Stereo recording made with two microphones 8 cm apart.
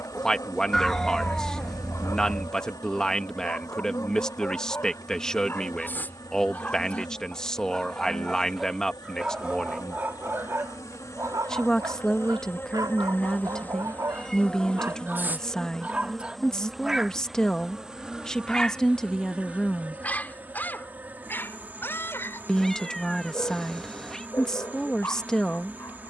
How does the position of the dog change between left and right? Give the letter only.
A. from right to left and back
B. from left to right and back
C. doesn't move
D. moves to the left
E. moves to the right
B.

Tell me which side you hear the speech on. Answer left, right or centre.
centre.